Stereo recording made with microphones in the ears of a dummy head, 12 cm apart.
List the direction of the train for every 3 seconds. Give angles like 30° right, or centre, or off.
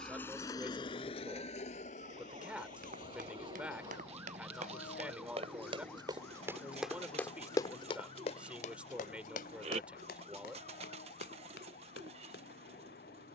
40° left, 70° left, 70° left, 80° left, 80° left.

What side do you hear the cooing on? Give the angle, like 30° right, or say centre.
50° right.